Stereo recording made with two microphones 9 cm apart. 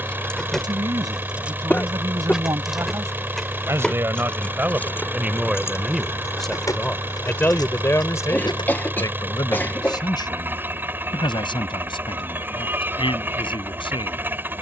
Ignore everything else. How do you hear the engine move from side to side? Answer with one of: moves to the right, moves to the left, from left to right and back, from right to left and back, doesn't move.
doesn't move.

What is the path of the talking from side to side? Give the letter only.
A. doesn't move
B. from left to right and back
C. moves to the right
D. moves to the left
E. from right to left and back
D.